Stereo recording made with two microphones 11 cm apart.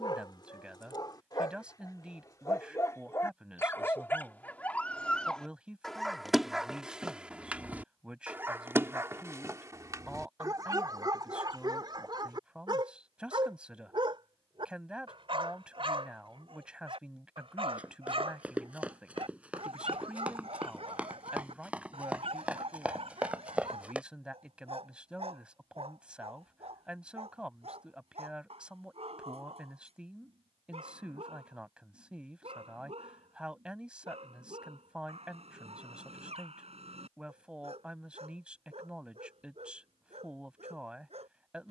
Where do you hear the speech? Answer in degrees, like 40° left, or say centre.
10° right.